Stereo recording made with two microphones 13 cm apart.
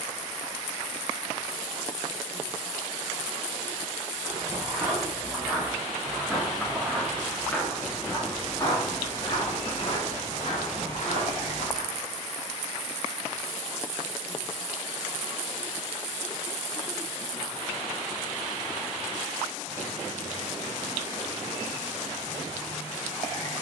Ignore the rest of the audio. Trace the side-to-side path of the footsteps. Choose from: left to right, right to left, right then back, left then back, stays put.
right to left.